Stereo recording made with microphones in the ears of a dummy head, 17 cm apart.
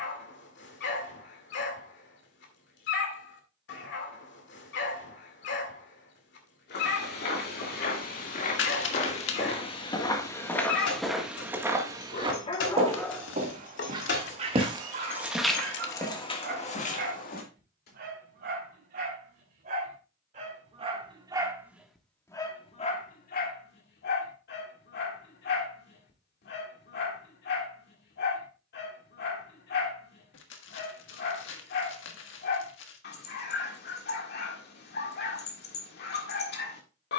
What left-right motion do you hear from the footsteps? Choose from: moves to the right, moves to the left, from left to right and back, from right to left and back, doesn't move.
from left to right and back.